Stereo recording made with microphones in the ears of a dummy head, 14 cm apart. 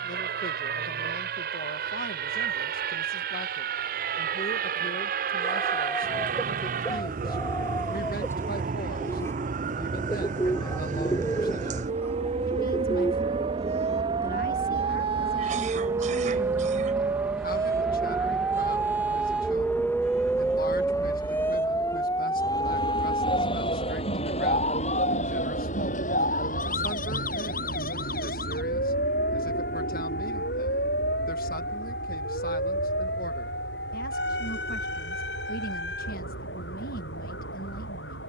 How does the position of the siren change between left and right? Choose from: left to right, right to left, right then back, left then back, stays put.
right to left.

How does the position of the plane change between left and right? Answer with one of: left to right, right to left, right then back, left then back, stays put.
right to left.